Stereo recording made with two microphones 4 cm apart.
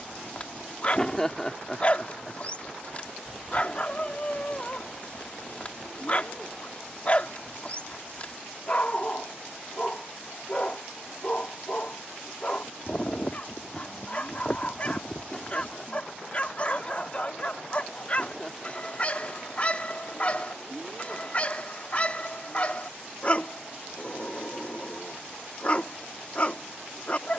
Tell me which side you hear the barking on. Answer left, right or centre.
left.